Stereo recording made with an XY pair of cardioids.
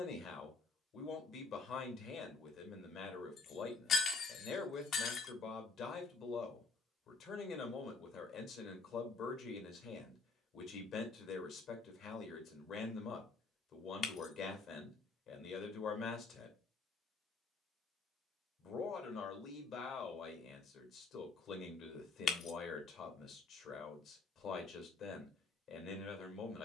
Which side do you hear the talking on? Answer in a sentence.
In this clip you hear the talking on the left.